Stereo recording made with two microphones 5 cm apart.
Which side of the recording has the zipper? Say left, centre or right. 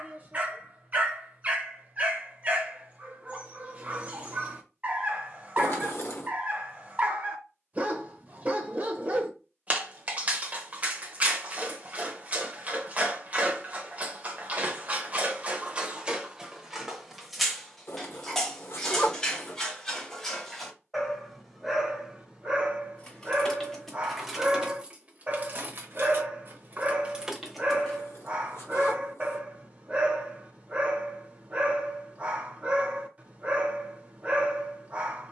left.